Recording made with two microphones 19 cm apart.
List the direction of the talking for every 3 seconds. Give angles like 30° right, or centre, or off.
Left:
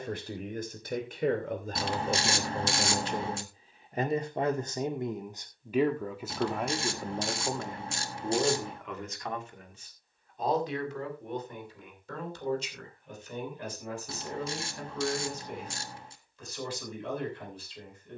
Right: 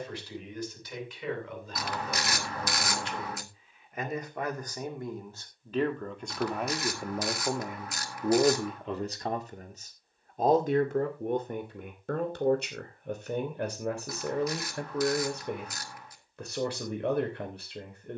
50° left, 20° left, 10° right, 50° right, 60° right, 70° right.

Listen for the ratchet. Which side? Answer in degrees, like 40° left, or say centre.
30° left.